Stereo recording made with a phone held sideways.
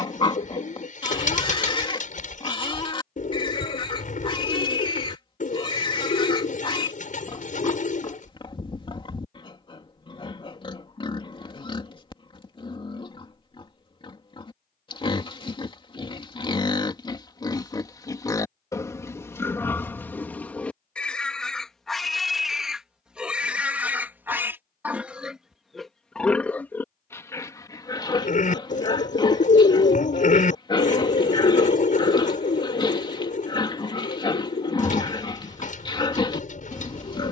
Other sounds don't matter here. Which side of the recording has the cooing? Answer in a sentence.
In this clip you hear the cooing on the left.